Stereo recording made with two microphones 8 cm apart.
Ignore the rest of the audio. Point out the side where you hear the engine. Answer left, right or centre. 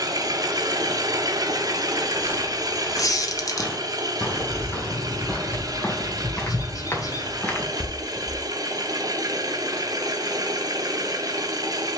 right.